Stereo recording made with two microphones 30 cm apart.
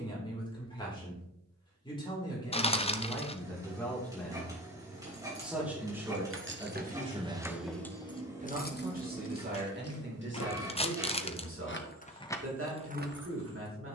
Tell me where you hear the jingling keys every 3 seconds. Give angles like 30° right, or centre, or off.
off, 60° right, 10° right, 50° left, 20° right.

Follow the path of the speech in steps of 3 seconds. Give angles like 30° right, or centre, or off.
10° left, centre, 20° right, 40° right, 50° right.